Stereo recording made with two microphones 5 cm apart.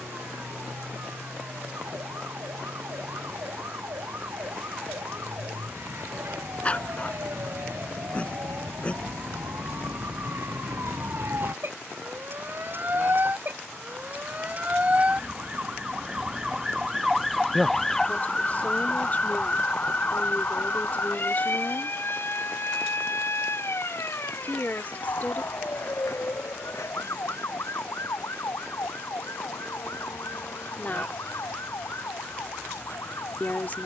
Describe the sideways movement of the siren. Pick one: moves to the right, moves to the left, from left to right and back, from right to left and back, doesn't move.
moves to the left.